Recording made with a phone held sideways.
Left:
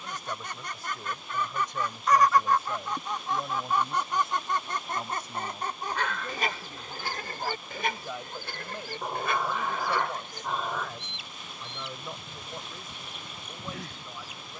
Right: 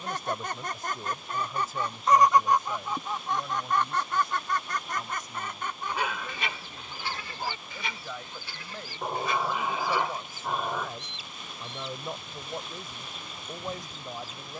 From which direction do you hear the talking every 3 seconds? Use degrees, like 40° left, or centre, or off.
10° right, 30° left, 20° left, 10° right, 40° right.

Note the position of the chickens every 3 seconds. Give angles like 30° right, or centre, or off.
30° right, 20° left, 50° left, 60° left, 70° left.